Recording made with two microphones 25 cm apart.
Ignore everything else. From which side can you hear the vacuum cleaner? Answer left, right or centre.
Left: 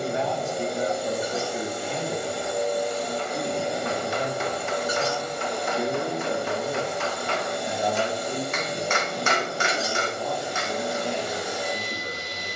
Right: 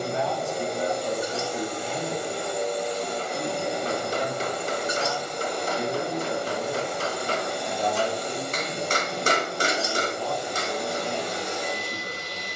centre.